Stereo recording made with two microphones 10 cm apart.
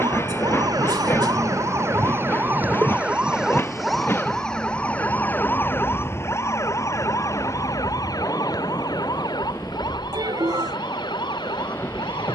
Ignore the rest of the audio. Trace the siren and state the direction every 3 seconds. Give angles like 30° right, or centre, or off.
30° right, 10° left, 40° left, 50° left.